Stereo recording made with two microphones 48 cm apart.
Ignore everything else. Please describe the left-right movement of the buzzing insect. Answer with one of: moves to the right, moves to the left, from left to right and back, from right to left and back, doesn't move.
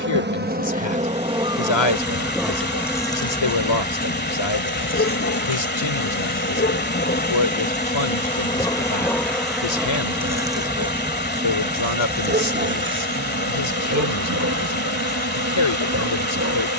from right to left and back.